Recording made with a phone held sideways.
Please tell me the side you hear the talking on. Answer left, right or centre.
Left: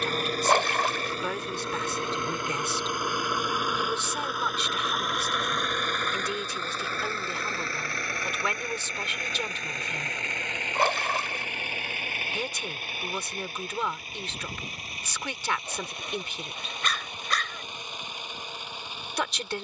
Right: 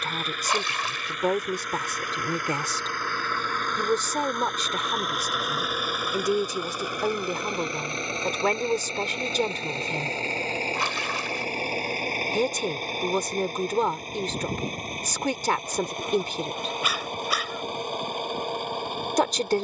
right.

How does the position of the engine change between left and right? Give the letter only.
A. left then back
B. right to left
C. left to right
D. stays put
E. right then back
C.